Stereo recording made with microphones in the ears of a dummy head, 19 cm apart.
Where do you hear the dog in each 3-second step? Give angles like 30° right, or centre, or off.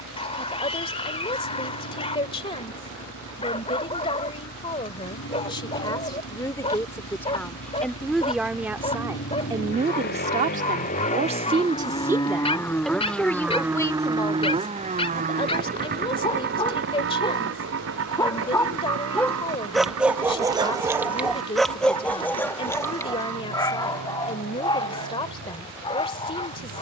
30° left, 30° left, 30° left, 30° left, 30° left, 20° left, centre, 10° left, 20° left.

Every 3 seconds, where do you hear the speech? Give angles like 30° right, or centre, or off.
20° left, 20° left, 10° left, 20° right, 10° left, 20° left, 20° left, 20° left, 20° left.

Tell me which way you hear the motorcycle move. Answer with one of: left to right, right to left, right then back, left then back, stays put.
left to right.